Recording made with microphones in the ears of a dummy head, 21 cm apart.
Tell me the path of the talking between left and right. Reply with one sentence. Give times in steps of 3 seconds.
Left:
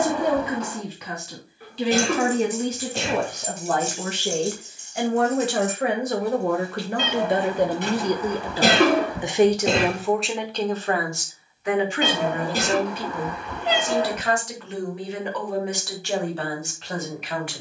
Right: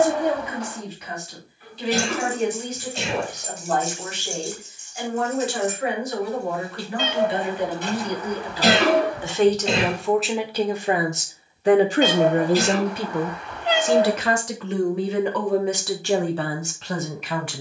You can hear the talking on the left from 0 s, in the centre from 9 s and on the right from 12 s.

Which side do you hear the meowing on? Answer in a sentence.
In this clip you hear the meowing on the left.